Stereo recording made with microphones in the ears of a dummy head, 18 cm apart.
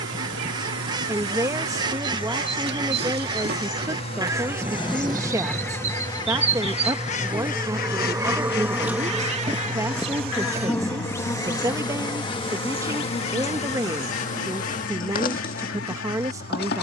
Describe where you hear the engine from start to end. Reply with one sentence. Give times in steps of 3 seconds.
You can hear the engine on the left from 0 s, in the centre from 6 s and on the right from 9 s.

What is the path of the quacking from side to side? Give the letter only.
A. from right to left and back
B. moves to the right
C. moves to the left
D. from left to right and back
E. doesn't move
C.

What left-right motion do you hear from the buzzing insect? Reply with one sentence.
You can hear the buzzing insect move from right to left.